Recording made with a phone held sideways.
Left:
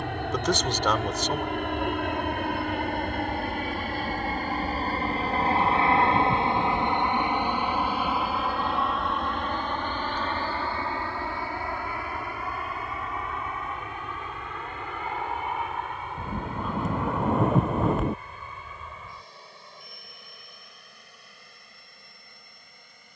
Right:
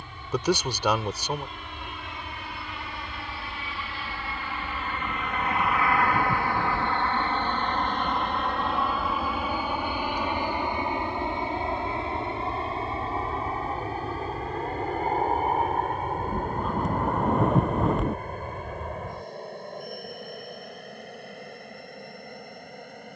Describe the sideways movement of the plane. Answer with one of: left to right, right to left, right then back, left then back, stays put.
left to right.